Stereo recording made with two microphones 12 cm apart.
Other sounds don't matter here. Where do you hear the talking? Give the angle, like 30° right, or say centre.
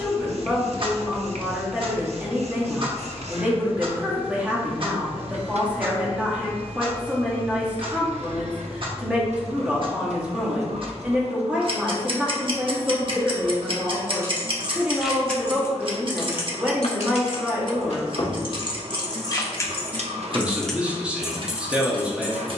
10° right.